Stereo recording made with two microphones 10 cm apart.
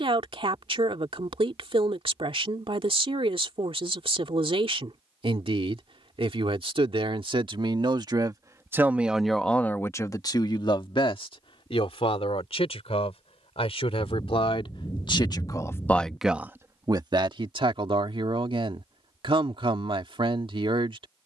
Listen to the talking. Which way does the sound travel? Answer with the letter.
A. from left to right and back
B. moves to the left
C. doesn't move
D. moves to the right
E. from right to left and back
E.